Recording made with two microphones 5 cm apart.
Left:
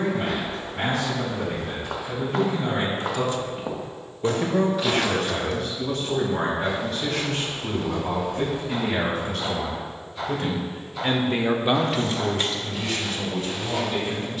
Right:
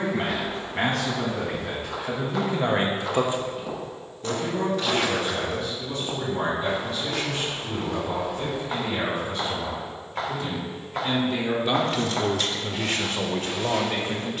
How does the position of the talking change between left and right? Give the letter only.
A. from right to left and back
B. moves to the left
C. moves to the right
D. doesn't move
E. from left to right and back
A.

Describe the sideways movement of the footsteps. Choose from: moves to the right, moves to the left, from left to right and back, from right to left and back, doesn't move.
moves to the right.